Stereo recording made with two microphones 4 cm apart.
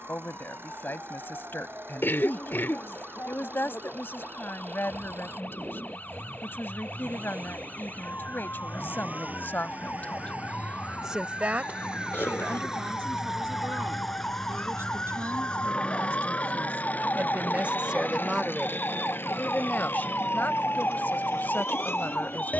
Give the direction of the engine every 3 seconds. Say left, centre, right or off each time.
right, right, right, right, centre, left, left, left.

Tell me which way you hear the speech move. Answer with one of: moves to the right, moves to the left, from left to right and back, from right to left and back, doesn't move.
from left to right and back.